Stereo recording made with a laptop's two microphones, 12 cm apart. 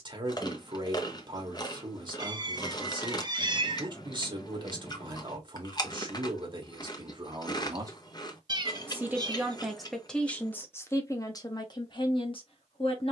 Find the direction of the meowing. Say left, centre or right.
right.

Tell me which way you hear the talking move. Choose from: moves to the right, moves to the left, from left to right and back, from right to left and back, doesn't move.
moves to the left.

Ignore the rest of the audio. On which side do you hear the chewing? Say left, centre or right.
left.